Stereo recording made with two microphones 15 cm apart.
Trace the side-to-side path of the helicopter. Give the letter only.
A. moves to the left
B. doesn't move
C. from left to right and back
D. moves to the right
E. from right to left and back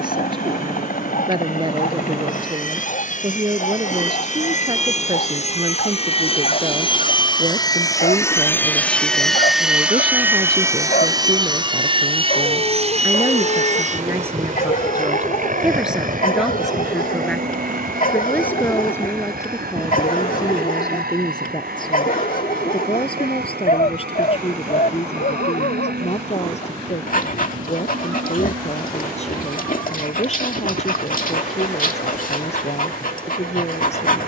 D.